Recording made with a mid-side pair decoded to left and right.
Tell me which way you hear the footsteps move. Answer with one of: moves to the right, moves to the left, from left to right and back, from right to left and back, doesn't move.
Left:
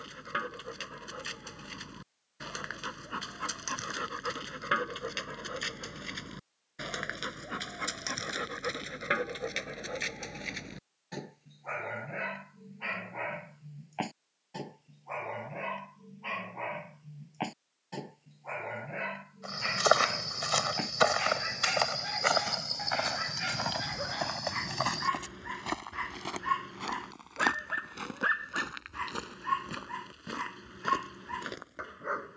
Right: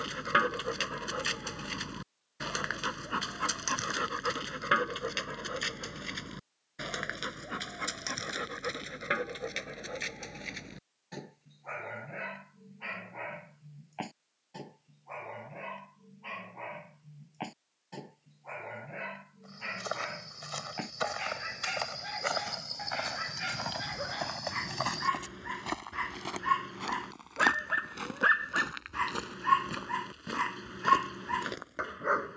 moves to the right.